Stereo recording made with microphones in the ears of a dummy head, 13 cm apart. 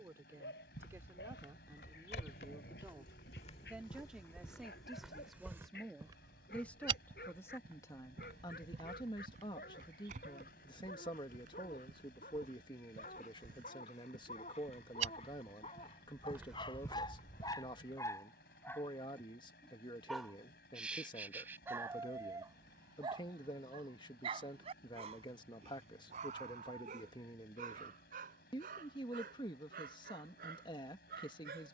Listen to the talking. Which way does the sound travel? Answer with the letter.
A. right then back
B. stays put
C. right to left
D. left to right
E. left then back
C.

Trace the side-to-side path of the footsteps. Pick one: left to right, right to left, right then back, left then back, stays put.
right then back.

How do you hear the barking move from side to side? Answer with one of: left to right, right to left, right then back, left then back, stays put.
left to right.